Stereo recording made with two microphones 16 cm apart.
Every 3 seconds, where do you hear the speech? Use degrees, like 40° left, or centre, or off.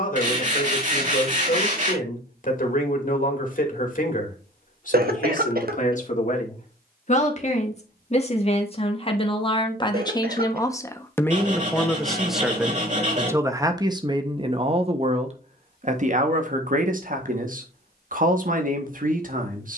50° left, 50° left, 40° left, 20° left, 20° right, 50° right, 60° right.